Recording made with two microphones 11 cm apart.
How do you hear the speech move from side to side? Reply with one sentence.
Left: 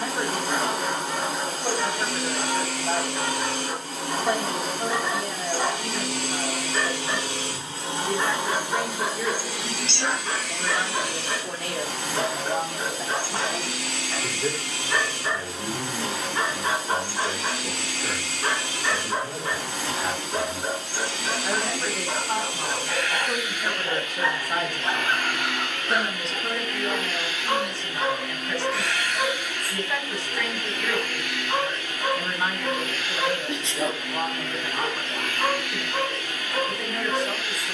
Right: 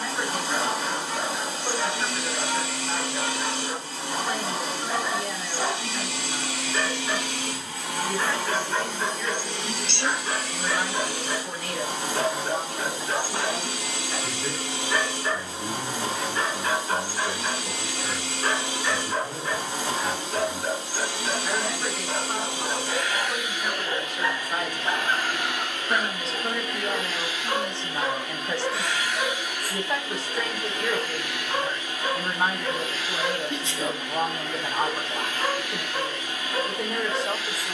You can hear the speech go from the left side to the right.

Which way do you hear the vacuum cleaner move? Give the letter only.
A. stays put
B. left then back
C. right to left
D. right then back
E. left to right
E.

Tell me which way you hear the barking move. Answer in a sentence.
You can hear the barking stay in one place.